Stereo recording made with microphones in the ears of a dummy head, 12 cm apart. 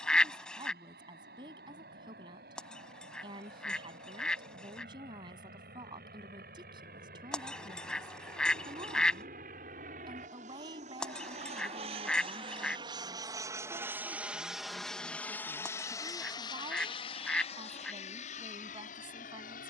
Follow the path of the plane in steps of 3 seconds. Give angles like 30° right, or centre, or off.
80° right, 70° right, 70° right, 50° right, 20° right, 30° left, 50° left.